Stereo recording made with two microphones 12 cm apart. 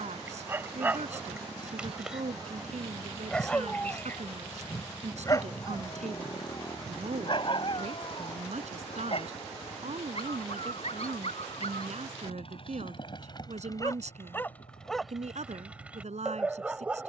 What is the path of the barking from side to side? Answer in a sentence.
You can hear the barking move from right to left and back again.